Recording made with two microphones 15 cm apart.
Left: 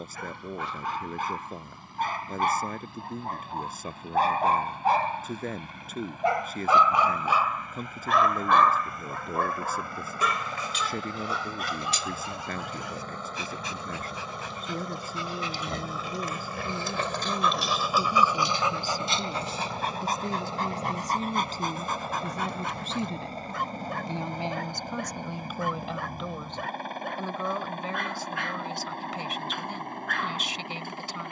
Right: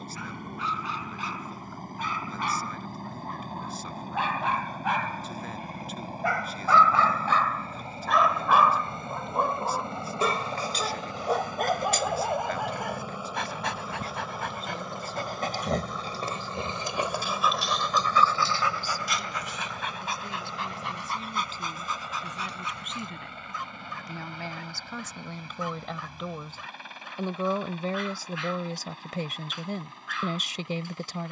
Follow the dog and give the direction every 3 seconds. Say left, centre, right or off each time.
left, left, centre, right, right, right, left, left, left, left, left.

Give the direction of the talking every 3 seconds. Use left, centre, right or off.
left, left, left, left, left, left, left, left, centre, right, right.